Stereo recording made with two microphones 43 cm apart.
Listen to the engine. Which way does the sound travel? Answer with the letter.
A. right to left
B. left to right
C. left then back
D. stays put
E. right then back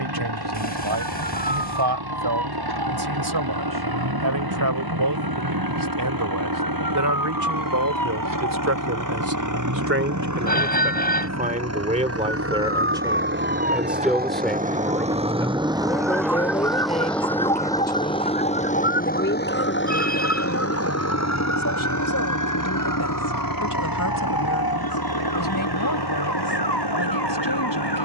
A.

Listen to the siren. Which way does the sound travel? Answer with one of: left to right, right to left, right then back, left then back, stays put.
right to left.